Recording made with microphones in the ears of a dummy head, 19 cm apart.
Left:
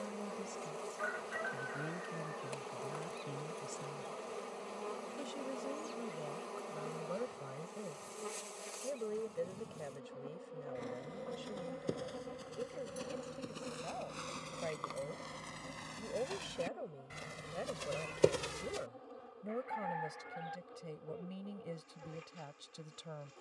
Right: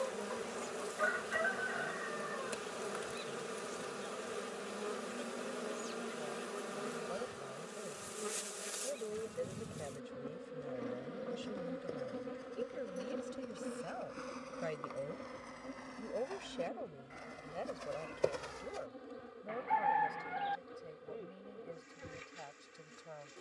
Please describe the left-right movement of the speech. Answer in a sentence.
You can hear the speech go right and come back.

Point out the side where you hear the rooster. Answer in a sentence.
In this clip you hear the rooster on the right.